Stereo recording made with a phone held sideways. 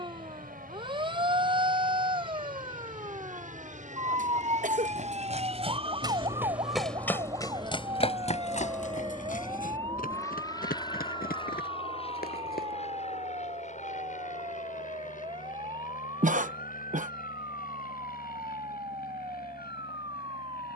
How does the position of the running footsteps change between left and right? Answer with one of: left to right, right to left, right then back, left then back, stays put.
right to left.